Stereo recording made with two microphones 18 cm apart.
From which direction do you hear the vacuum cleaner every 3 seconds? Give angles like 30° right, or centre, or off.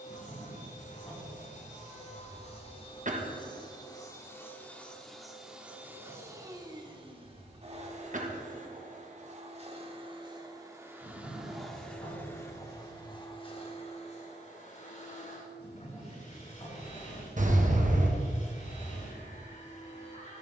40° left, 10° left, 30° right, 20° right, 30° left, 40° left, 40° left.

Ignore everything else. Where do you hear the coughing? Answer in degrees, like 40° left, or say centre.
40° right.